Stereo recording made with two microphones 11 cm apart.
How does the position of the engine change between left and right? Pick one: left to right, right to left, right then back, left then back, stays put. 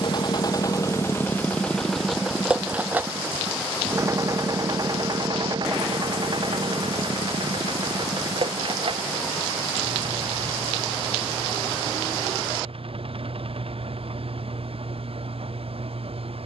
left to right.